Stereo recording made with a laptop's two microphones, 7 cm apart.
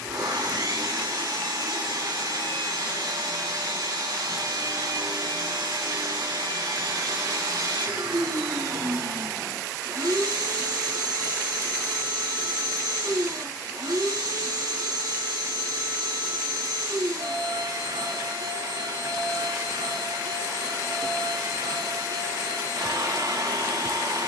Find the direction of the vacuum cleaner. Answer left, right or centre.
right.